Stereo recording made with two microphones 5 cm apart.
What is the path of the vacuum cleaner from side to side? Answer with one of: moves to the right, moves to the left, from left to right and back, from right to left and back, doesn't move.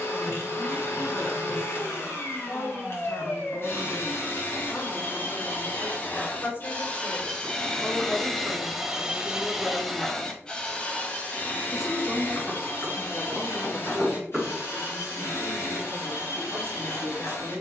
from left to right and back.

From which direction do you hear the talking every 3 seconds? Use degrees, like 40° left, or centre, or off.
60° left, 50° left, 40° left, 10° left, 30° right, 60° right.